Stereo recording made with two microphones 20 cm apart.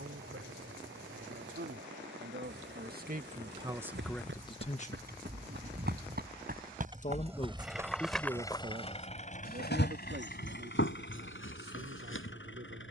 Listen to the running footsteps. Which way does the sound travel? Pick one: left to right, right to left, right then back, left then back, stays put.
right to left.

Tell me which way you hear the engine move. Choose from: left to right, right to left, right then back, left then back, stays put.
right to left.